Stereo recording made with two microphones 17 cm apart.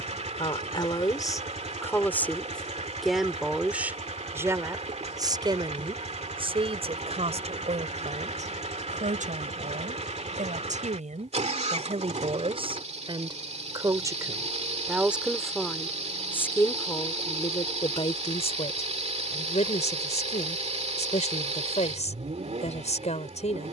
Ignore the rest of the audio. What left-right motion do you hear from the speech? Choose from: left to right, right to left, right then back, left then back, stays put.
right then back.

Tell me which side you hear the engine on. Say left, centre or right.
right.